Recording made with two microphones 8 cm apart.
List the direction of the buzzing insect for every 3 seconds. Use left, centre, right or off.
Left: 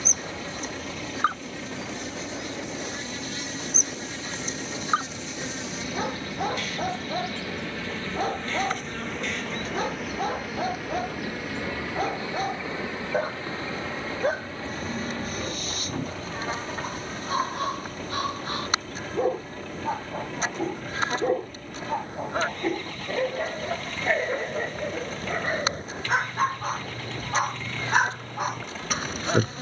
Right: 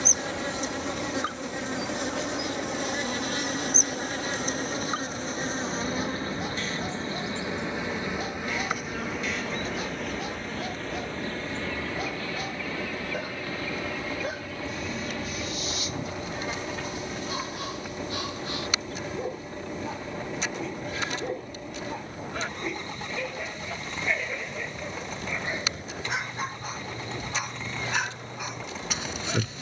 right, right, right, centre, left, left, left, left, left, left.